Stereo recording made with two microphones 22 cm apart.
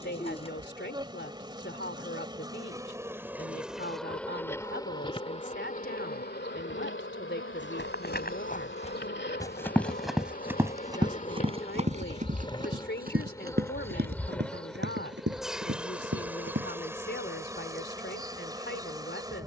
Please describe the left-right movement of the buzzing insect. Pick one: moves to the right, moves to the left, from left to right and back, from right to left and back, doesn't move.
from right to left and back.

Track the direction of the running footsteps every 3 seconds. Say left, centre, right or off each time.
off, off, left, centre, right, right, off.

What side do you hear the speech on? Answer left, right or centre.
left.